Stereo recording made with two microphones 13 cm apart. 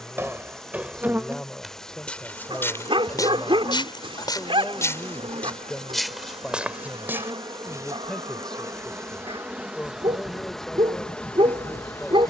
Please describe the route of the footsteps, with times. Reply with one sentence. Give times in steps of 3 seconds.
In this clip you hear the footsteps in the centre from 0 s, on the left from 3 s, in the centre from 6 s and not at all from 9 s.